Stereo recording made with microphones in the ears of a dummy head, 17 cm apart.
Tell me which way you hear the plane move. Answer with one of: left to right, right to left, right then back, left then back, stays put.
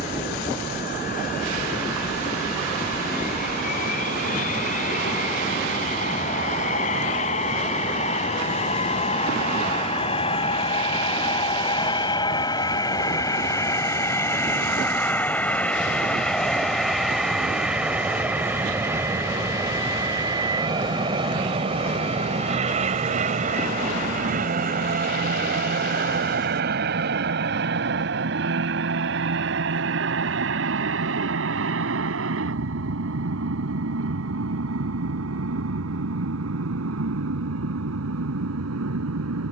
left to right.